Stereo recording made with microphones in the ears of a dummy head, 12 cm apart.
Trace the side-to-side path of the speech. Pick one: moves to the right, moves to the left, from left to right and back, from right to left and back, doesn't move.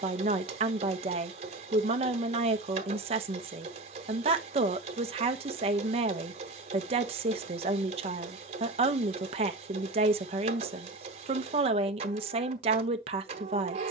doesn't move.